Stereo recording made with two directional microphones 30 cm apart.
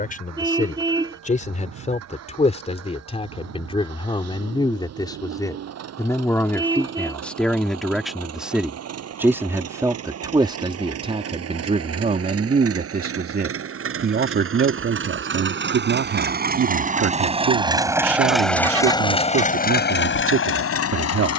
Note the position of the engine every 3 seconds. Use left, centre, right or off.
right, right, right, right, right, right, left.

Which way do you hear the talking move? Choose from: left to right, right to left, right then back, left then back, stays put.
left to right.